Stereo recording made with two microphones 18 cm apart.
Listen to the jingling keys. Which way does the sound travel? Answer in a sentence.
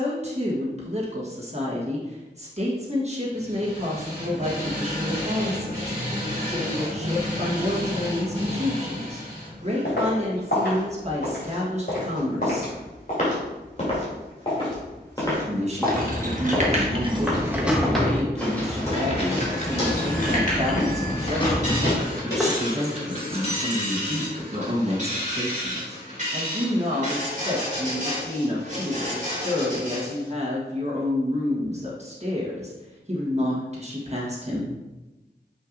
In this clip you hear the jingling keys move from right to left and back again.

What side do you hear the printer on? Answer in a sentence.
In this clip you hear the printer on the right.